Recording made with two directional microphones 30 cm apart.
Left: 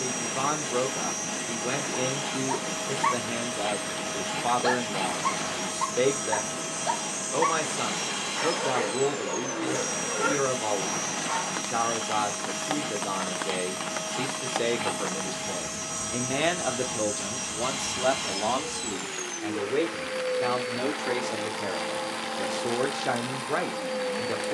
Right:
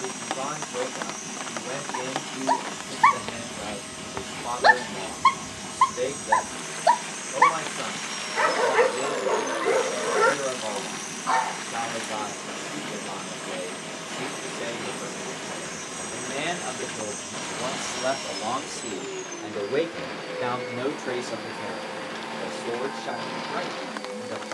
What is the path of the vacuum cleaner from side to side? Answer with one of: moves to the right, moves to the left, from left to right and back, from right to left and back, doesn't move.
doesn't move.